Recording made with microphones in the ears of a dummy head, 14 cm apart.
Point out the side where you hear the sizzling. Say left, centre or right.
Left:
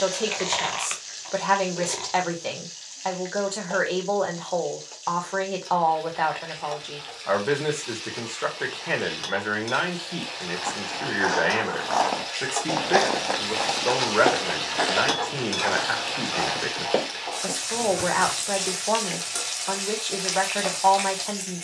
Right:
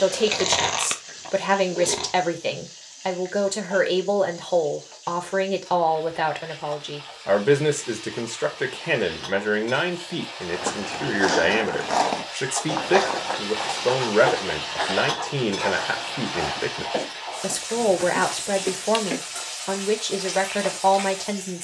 left.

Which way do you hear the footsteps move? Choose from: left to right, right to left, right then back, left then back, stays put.
right to left.